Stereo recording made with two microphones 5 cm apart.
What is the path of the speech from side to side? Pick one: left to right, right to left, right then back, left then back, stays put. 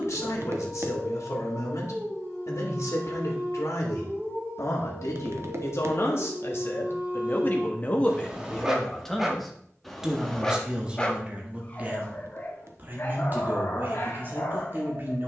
left to right.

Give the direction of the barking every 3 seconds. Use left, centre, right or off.
right, right, right, centre, left.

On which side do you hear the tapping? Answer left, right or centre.
right.